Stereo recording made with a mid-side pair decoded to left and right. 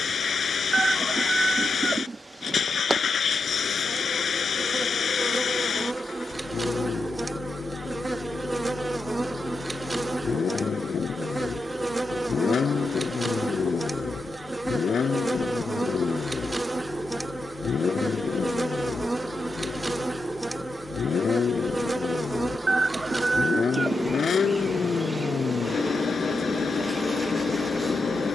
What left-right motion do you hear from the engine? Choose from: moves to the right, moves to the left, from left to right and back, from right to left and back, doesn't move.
doesn't move.